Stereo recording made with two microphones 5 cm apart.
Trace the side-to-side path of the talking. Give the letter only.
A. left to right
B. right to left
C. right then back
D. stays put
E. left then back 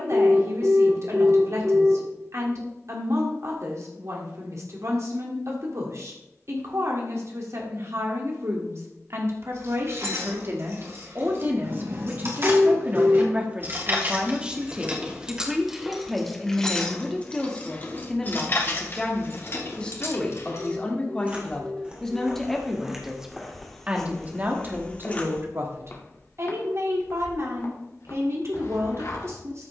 E.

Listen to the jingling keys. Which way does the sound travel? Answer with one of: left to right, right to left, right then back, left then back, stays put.
right to left.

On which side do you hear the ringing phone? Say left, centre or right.
right.